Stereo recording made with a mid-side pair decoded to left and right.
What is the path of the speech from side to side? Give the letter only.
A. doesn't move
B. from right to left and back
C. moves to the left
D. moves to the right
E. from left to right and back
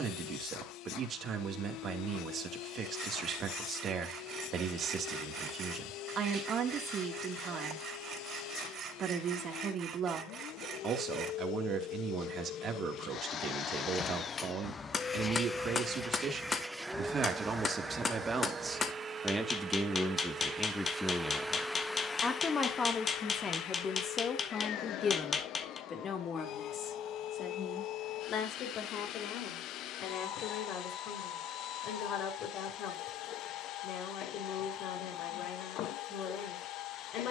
C.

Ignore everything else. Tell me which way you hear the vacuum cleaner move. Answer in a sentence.
In this clip you hear the vacuum cleaner move from left to right and back again.